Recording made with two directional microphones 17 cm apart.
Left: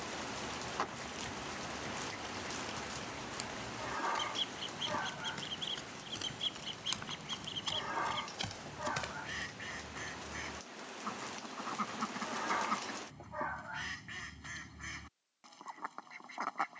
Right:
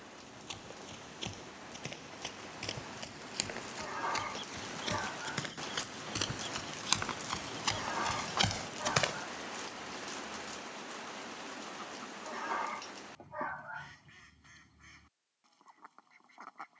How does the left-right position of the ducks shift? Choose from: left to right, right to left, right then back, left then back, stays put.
stays put.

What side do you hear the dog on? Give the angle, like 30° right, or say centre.
centre.